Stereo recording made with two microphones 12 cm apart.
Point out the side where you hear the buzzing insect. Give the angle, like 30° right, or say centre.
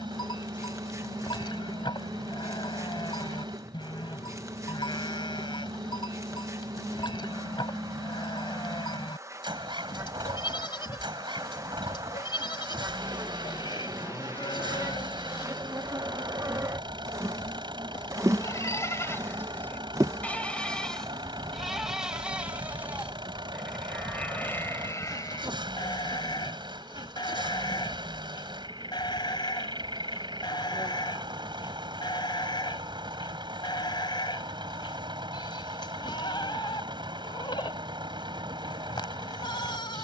30° right.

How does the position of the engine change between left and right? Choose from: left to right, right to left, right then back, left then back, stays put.
stays put.